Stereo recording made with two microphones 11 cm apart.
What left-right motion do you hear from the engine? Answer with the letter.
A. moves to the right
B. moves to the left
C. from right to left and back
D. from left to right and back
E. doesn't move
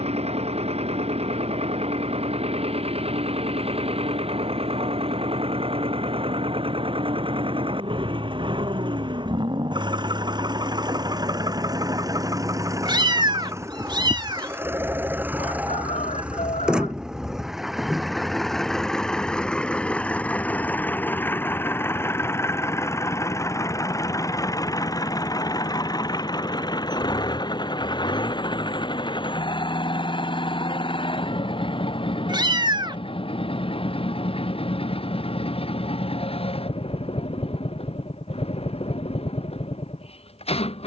B.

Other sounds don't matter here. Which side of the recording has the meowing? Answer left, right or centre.
right.